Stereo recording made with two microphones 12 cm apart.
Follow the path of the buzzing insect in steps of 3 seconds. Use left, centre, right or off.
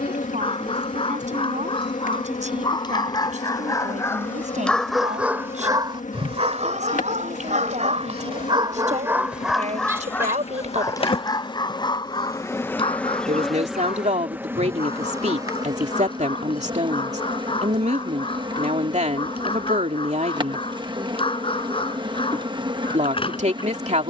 left, left, left, left, centre, right, right, right.